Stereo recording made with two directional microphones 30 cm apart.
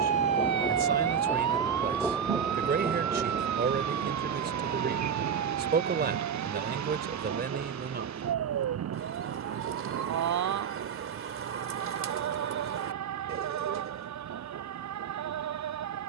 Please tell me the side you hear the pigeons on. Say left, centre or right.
right.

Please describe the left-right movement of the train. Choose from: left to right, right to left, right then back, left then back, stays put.
left to right.